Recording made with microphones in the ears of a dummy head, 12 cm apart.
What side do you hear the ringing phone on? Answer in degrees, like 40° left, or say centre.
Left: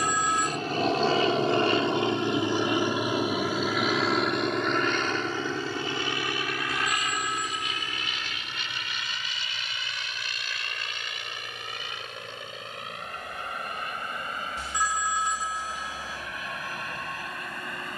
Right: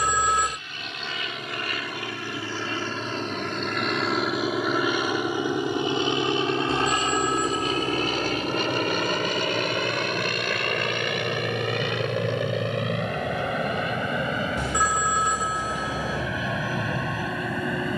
50° right.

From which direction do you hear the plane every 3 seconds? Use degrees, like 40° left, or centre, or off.
30° left, centre, 30° right, 40° right, 50° right, 60° right.